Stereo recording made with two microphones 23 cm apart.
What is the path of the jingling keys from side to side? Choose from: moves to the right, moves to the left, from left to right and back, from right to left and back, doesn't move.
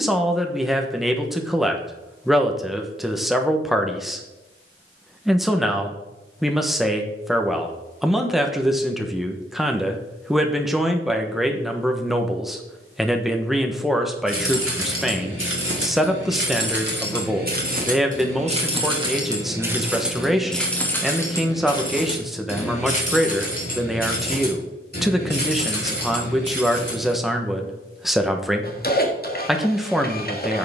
moves to the left.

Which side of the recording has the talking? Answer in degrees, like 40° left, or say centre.
centre.